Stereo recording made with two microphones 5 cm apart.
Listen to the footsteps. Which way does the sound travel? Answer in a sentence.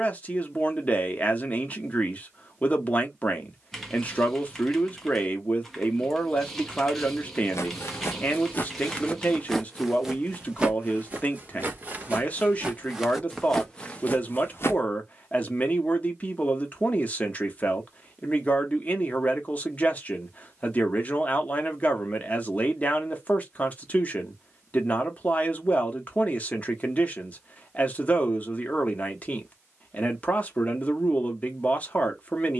In this clip you hear the footsteps move from left to right and back again.